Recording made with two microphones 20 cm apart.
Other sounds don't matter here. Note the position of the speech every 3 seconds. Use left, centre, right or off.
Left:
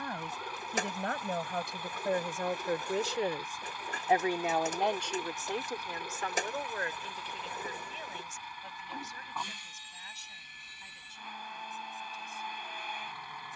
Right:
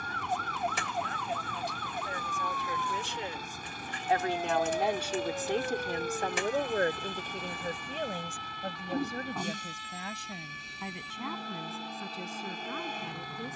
left, centre, right, right, right.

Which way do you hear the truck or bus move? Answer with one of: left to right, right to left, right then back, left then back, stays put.
stays put.